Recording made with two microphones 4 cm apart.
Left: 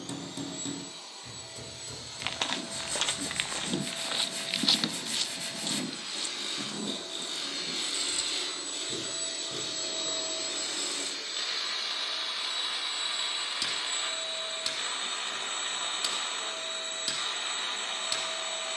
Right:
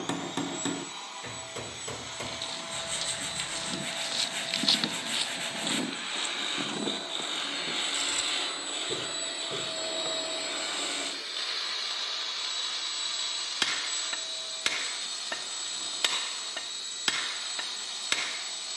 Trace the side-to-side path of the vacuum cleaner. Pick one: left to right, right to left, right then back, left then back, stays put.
right to left.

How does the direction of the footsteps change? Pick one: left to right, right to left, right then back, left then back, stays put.
left to right.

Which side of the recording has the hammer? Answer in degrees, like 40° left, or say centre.
60° right.